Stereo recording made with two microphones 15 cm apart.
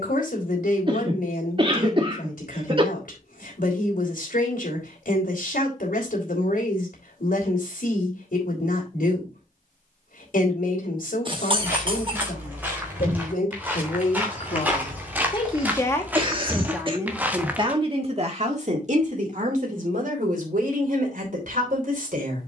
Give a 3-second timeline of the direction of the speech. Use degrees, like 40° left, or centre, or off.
70° left, 70° left, 70° left, 70° left, 60° left, 10° right, 60° right, 70° right.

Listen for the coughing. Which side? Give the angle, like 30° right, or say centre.
40° right.